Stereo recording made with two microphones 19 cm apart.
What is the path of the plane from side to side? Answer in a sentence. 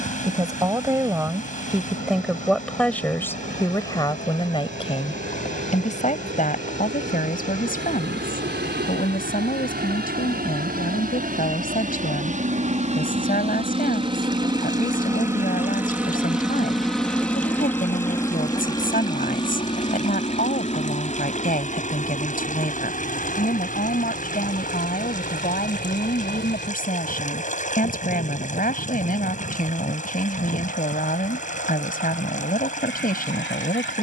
In this clip you hear the plane move to the left.